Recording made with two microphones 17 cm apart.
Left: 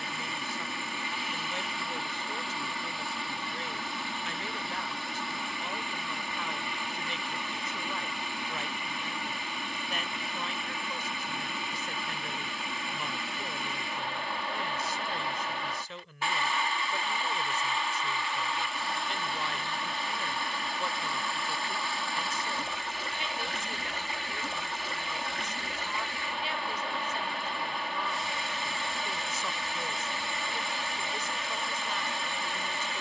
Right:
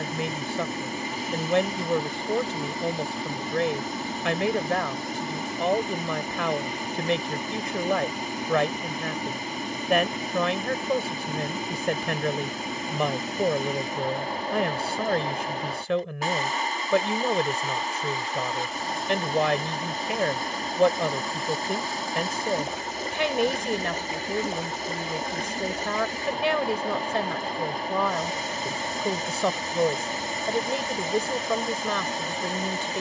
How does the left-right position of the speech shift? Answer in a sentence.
You can hear the speech stay put.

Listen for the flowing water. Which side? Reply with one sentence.
In this clip you hear the flowing water on the right.